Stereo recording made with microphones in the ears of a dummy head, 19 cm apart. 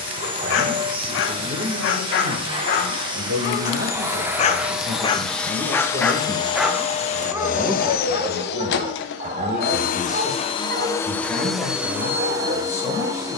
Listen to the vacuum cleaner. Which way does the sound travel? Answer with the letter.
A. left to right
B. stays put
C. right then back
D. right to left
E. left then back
E.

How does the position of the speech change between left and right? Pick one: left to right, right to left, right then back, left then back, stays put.
right to left.